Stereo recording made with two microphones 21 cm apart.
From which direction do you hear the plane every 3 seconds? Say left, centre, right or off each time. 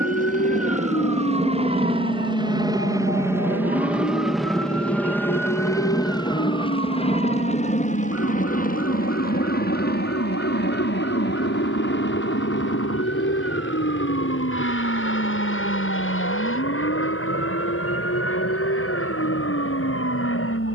right, centre, left, left, left, left, left.